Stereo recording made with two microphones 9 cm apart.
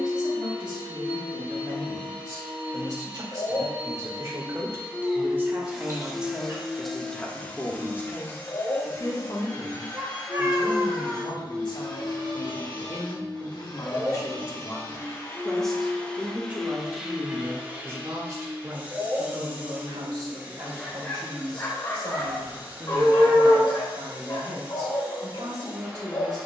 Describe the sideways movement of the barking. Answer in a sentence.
In this clip you hear the barking go right and come back.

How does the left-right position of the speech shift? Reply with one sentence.
In this clip you hear the speech move from right to left and back again.